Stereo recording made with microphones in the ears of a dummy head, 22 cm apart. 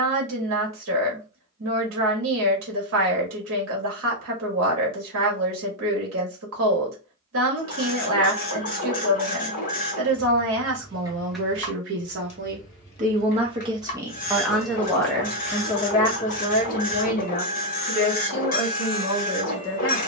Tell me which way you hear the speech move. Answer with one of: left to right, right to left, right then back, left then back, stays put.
right to left.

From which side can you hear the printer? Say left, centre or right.
left.